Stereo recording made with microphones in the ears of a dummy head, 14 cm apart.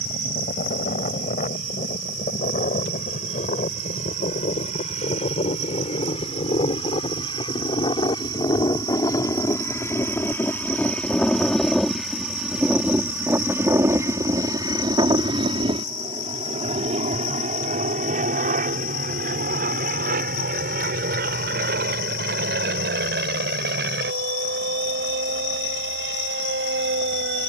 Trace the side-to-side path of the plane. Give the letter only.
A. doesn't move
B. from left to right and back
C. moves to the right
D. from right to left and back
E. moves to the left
C.